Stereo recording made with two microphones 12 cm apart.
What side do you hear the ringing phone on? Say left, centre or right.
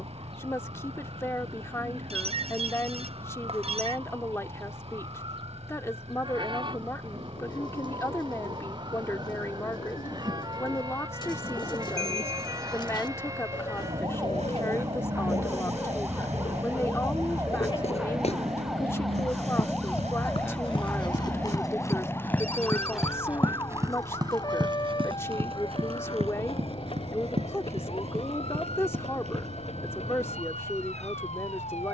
right.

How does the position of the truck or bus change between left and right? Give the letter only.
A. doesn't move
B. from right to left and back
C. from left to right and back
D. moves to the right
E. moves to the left
A.